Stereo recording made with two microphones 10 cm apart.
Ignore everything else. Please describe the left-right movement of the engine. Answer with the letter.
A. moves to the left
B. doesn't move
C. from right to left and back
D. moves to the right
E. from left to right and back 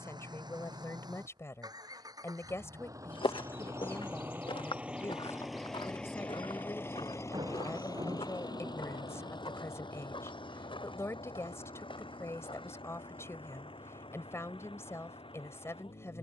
A.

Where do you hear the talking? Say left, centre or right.
left.